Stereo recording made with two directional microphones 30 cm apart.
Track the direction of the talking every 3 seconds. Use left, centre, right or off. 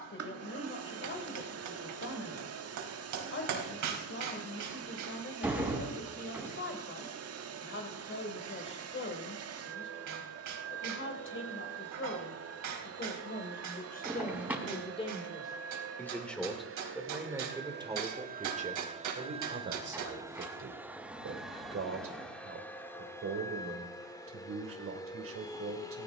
left, left, left, left, left, centre, right, right, right.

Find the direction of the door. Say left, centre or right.
centre.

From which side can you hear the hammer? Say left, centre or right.
right.